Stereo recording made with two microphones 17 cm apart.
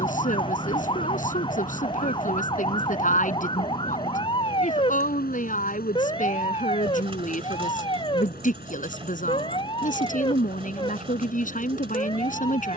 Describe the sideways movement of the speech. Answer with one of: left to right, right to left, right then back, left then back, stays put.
stays put.